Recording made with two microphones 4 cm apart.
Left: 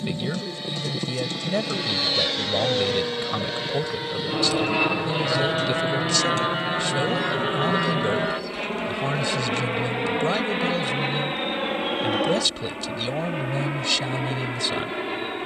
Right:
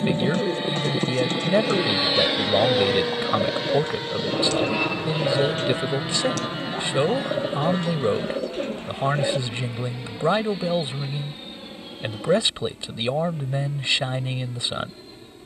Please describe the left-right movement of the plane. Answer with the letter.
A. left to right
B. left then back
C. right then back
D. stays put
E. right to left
E.